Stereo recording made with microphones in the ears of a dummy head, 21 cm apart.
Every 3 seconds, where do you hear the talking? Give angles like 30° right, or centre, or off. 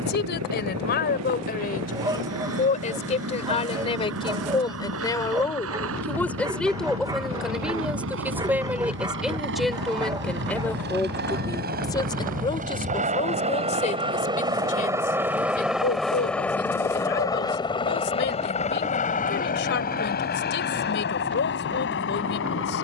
40° left, 20° left, centre, 10° left, 30° left, 40° left, 50° left, 50° left.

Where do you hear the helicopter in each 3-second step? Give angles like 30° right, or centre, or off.
70° right, 70° right, 60° right, 50° right, 30° right, 10° left, 30° left, 50° left.